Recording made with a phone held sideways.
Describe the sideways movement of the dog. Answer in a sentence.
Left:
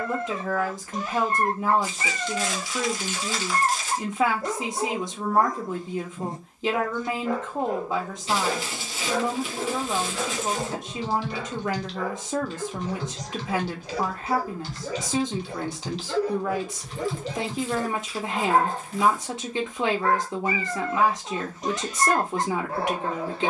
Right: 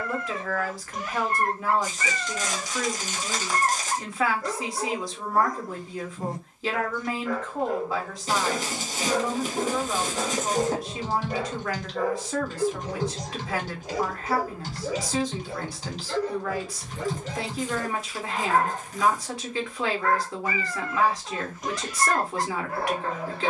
You can hear the dog go right and come back.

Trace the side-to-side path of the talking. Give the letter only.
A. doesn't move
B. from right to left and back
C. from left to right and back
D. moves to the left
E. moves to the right
A.